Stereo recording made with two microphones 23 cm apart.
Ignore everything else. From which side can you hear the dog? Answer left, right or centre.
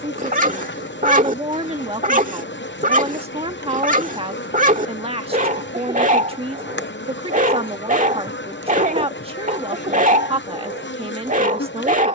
right.